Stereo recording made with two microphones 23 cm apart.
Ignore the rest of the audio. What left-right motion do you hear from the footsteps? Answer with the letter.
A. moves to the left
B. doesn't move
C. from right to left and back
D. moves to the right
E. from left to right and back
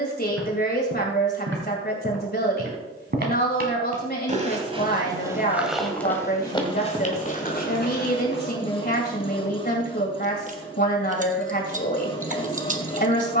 A.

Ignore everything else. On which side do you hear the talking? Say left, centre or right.
left.